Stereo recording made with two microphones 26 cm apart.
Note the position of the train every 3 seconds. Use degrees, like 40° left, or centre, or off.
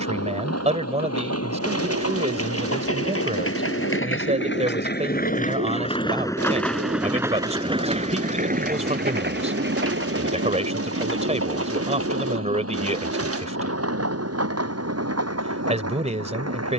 70° left, 40° left, 10° right, 50° right, 60° right, 70° right.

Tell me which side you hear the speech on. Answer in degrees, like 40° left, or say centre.
30° right.